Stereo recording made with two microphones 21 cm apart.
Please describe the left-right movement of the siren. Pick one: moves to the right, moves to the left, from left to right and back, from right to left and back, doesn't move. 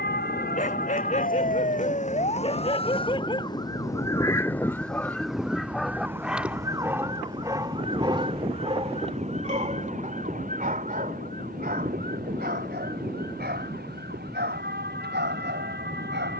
moves to the right.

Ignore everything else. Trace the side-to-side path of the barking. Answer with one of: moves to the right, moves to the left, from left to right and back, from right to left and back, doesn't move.
moves to the right.